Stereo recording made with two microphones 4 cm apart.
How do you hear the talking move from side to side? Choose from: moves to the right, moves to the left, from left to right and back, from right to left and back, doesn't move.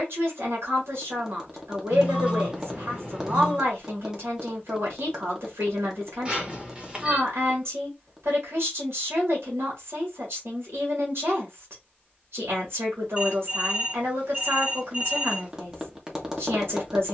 doesn't move.